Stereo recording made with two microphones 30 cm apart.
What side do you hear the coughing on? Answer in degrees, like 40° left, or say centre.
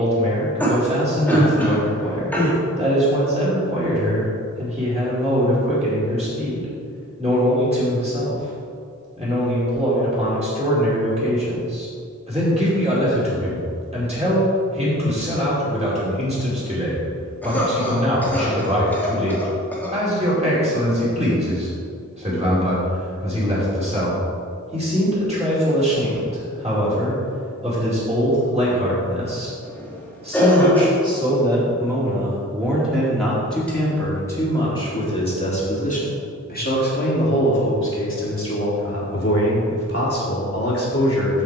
10° left.